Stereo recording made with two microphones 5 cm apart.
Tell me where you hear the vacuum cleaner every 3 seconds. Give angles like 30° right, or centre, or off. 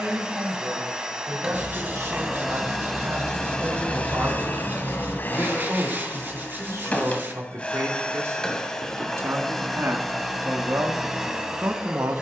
10° right, 30° left, 20° left, centre.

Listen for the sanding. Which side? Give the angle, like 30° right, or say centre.
40° right.